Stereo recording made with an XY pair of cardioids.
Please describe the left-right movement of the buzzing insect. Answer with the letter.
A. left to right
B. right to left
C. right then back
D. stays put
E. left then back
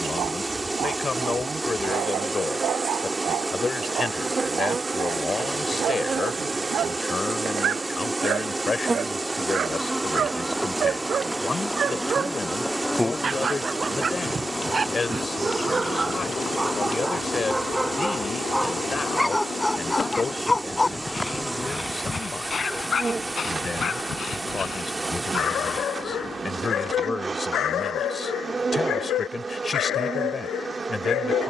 E.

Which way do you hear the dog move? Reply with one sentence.
In this clip you hear the dog travel towards the left.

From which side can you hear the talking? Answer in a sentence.
In this clip you hear the talking on the left.